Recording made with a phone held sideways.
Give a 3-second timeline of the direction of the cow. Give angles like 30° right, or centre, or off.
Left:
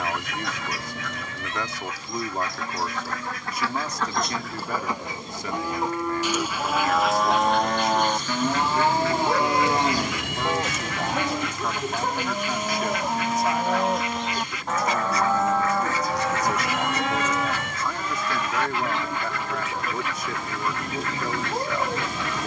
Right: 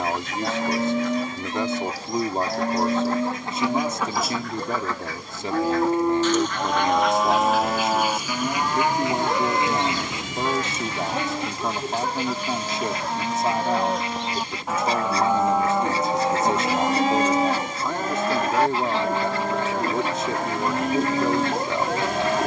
70° right, 60° right, 10° right, 20° left, 10° left, 30° right, 60° right, 60° right.